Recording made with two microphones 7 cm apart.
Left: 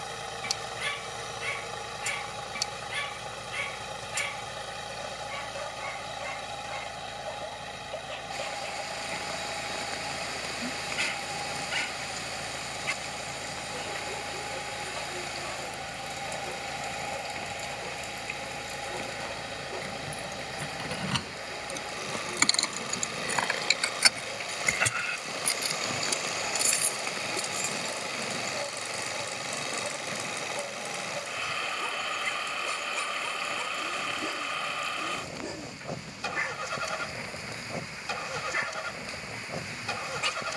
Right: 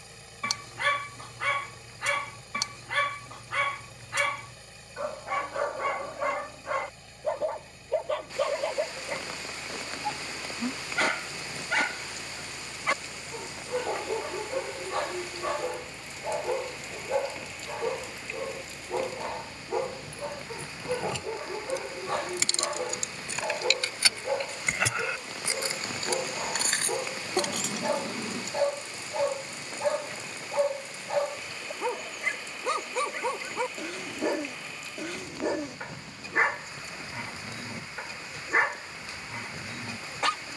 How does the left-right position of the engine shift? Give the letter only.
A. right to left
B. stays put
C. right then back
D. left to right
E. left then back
B.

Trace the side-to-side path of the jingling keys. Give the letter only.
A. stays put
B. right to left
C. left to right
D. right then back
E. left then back
C.